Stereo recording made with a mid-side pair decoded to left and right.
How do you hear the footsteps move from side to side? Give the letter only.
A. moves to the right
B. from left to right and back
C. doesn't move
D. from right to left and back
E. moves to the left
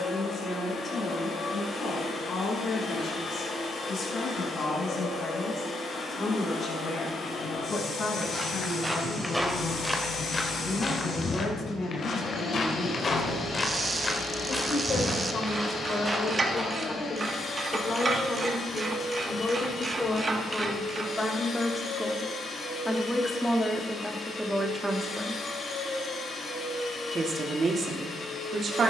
D.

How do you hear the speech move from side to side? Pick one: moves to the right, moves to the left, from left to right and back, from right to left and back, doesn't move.
moves to the right.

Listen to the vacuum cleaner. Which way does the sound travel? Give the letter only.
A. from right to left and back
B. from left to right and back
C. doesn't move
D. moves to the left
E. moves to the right
C.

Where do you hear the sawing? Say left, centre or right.
left.